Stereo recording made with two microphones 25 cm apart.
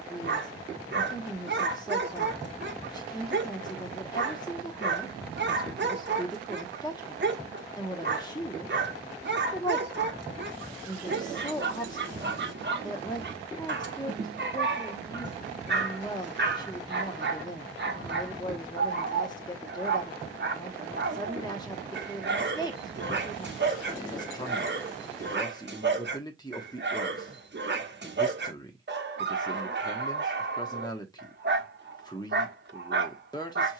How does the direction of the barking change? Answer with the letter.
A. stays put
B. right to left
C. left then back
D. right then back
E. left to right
A.